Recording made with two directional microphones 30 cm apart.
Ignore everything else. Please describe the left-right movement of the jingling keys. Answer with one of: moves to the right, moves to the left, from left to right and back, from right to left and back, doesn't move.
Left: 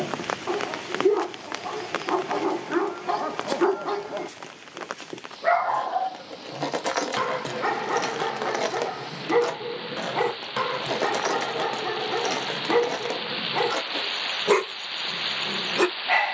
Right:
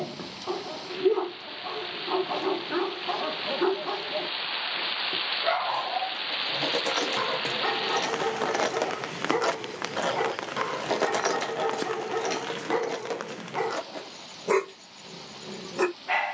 from left to right and back.